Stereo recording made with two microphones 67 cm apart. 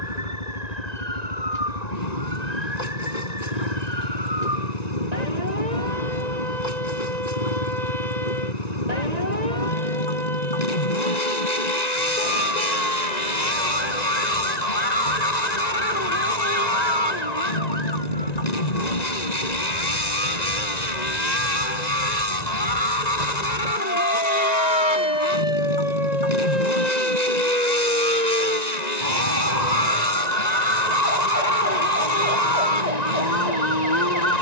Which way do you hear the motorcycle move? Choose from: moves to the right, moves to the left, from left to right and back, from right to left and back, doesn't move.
doesn't move.